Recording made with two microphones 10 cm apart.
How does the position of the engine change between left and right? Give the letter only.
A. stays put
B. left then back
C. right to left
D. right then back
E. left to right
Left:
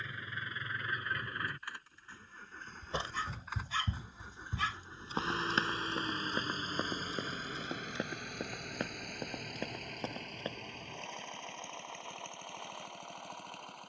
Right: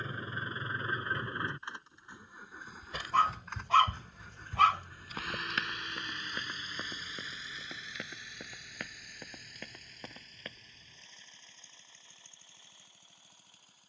C.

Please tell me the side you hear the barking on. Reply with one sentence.
You can hear the barking on the right.